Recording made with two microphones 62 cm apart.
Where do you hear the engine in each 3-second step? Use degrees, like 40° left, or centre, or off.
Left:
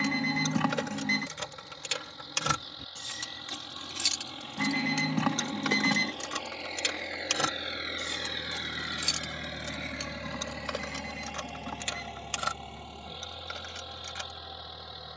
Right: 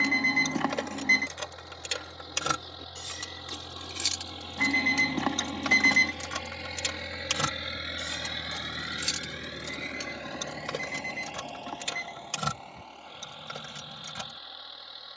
70° right, 60° right, 30° right, 30° left, 60° left.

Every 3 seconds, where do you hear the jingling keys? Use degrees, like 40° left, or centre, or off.
40° left, 10° left, 30° right, 50° right, 70° right.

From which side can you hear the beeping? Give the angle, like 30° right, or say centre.
40° left.